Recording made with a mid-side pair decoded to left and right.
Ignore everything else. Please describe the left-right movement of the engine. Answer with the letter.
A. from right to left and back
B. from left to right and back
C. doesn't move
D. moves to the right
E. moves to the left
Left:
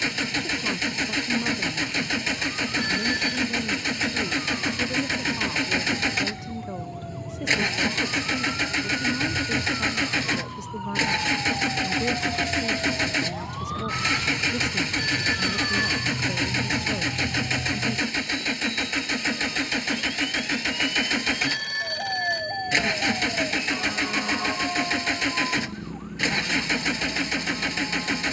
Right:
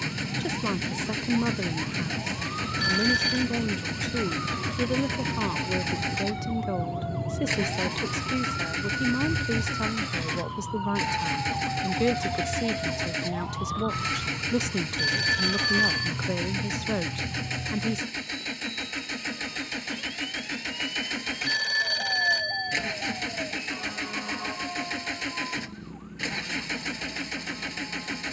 C.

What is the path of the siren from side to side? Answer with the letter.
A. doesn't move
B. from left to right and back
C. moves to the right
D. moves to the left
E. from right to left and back
D.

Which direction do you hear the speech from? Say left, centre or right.
right.